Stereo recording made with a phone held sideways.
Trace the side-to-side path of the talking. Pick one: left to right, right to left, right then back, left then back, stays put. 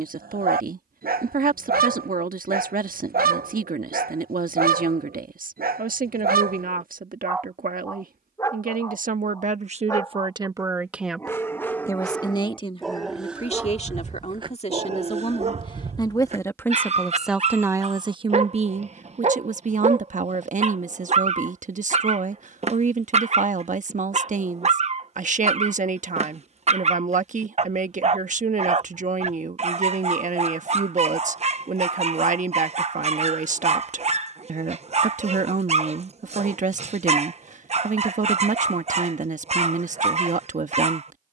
left then back.